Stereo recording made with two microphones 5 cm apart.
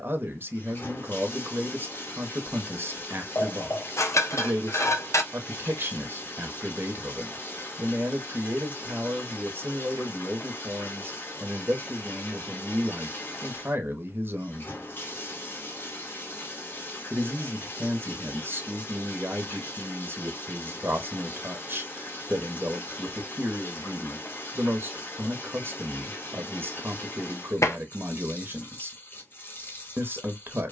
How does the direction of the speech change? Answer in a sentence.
In this clip you hear the speech stay put.